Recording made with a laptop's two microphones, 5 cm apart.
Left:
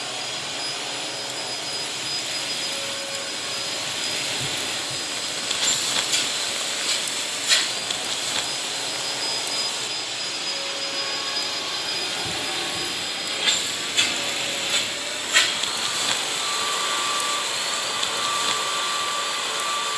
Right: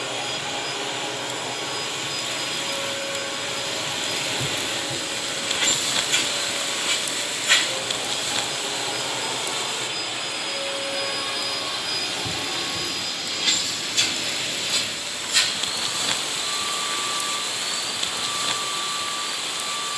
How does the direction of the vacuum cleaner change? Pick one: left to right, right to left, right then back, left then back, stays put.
right to left.